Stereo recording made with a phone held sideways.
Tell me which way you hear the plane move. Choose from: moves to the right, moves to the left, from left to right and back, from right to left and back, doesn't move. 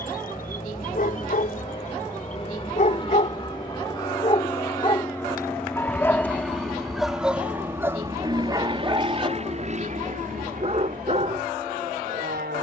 moves to the right.